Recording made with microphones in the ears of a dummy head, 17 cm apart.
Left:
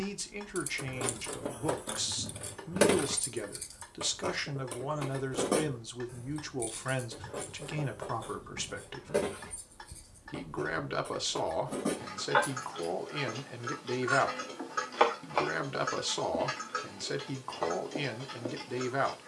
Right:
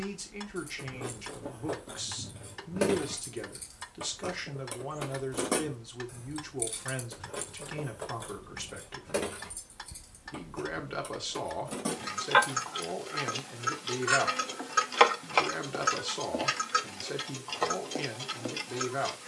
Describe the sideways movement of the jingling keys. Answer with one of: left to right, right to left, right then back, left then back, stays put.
left to right.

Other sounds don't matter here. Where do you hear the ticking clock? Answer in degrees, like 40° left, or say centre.
60° right.